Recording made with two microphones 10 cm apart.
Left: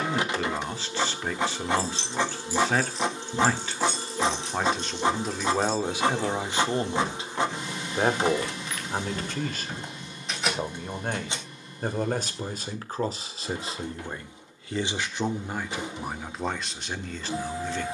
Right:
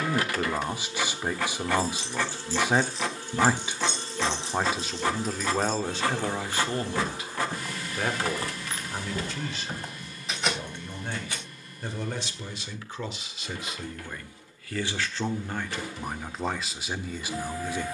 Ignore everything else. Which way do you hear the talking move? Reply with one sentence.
In this clip you hear the talking go left and come back.